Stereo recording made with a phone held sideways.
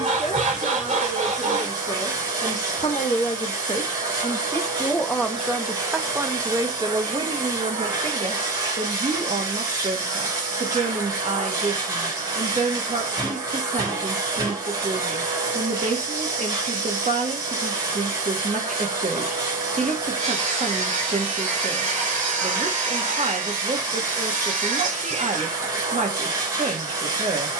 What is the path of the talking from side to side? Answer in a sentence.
You can hear the talking move to the right.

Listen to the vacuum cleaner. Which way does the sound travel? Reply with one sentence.
You can hear the vacuum cleaner stay put.